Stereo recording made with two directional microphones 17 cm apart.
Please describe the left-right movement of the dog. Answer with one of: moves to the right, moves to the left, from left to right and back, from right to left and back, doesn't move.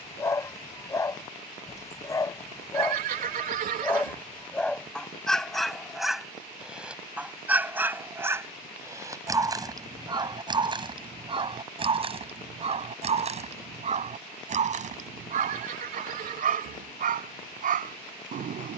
moves to the right.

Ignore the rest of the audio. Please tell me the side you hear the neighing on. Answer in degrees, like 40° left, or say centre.
50° right.